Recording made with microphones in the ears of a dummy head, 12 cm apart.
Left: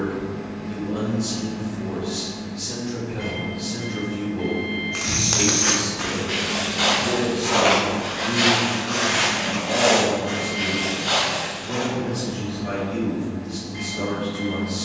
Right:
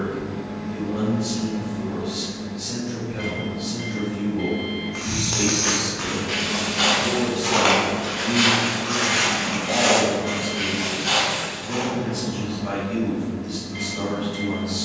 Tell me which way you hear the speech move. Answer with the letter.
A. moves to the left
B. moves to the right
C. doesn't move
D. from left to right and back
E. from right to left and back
B.